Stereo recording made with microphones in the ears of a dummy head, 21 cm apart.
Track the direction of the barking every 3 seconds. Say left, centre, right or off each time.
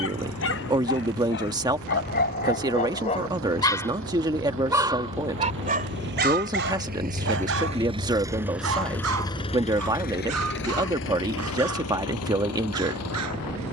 left, centre, right, right, right.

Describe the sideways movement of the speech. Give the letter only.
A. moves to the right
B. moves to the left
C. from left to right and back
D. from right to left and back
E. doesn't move
E.